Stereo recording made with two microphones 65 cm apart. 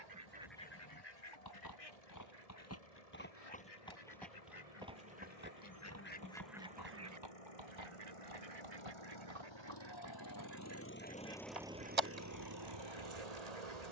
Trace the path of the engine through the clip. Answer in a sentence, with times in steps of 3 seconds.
In this clip you hear the engine on the left from 0 s and on the right from 12 s.